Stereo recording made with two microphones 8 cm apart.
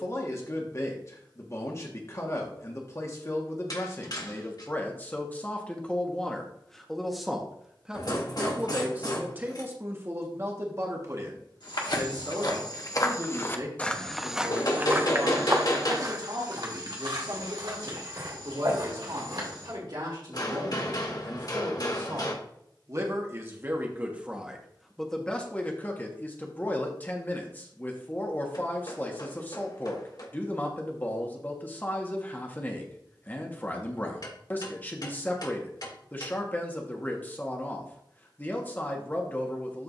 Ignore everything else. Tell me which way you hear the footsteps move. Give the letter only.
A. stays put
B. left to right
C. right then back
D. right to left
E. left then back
B.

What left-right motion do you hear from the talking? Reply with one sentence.
In this clip you hear the talking move from left to right and back again.